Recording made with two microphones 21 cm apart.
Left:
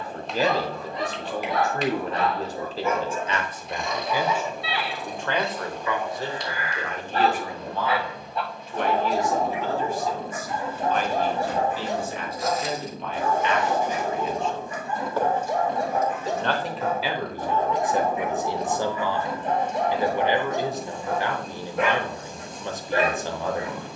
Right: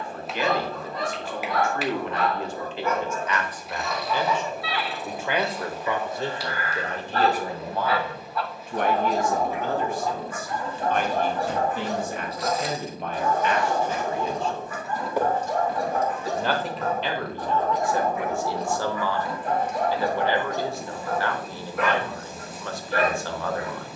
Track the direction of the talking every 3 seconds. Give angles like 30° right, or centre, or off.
40° left, 10° left, 40° right, 50° right, 40° right, 10° left, 20° left, 20° left.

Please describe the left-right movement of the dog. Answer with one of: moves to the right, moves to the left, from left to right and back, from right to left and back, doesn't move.
doesn't move.